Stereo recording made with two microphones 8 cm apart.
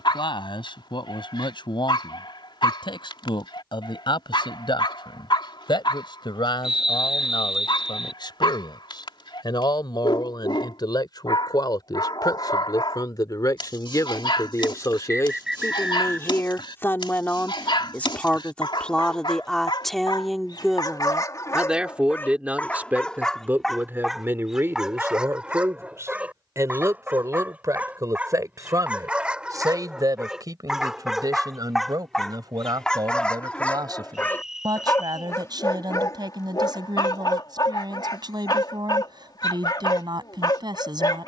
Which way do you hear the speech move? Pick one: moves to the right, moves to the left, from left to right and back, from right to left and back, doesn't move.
moves to the right.